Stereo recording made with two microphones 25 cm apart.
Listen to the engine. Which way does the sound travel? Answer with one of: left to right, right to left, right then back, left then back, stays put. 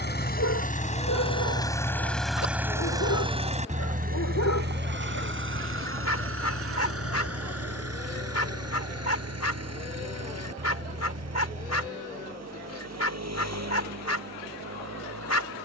left to right.